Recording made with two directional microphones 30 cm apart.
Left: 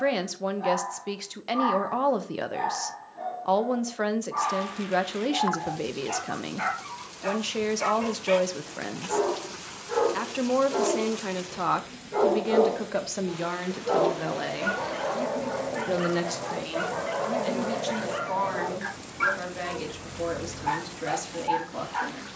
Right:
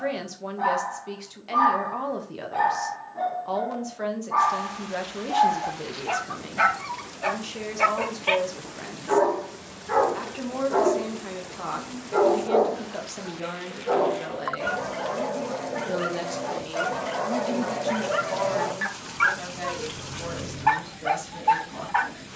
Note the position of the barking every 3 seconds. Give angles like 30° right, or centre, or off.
60° right, 60° right, 60° right, 50° right, 10° right, 10° right, 50° right, 60° right.